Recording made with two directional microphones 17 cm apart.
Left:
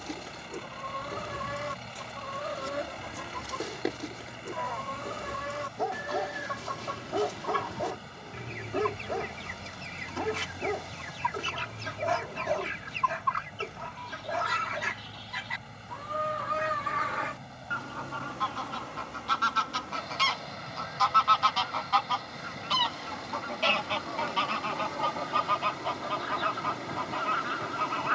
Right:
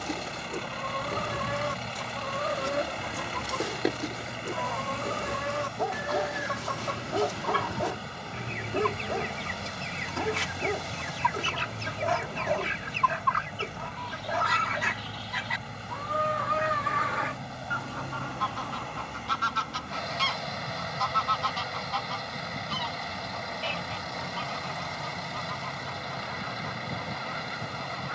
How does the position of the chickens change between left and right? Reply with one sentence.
You can hear the chickens move from right to left.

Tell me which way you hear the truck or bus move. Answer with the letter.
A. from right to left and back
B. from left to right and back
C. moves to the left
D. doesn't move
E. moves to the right
D.